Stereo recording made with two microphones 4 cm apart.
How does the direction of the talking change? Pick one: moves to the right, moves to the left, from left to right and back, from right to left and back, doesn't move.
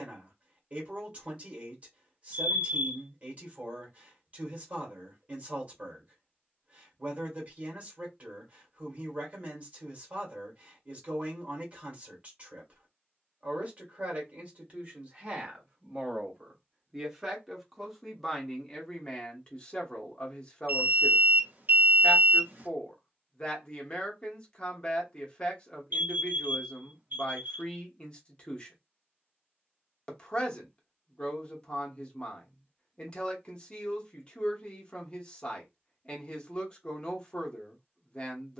moves to the left.